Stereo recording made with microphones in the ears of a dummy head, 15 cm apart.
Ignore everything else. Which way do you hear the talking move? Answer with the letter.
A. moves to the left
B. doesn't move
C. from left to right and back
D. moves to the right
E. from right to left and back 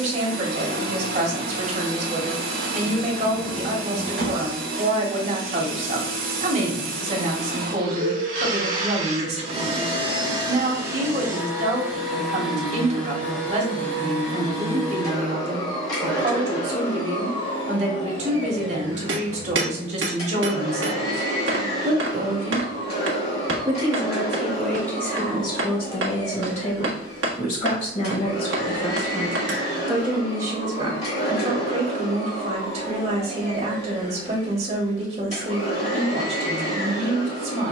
E.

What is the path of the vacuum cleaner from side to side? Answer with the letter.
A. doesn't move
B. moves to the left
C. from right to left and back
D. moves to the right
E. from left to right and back
B.